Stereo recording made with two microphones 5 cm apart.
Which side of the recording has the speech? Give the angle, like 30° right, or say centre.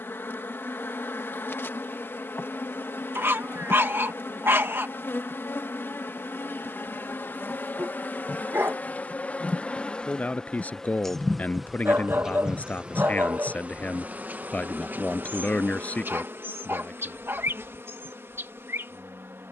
30° left.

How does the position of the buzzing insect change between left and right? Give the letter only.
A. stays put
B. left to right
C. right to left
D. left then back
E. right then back
B.